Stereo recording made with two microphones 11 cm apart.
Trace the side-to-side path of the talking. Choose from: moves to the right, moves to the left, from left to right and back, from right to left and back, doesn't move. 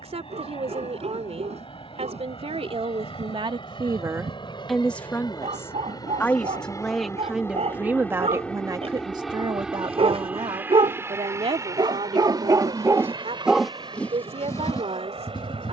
from right to left and back.